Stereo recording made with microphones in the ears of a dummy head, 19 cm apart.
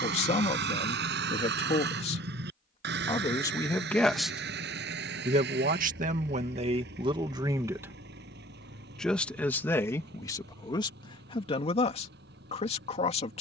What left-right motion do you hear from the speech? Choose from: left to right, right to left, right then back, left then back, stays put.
right then back.